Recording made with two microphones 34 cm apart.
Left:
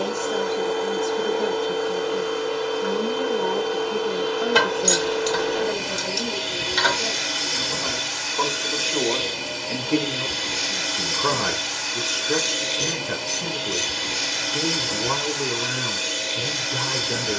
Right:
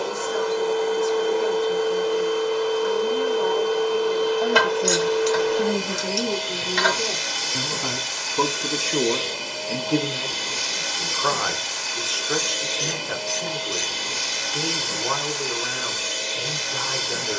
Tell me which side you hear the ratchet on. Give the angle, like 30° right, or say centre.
50° left.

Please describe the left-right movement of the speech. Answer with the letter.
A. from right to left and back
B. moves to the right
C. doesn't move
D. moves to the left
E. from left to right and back
E.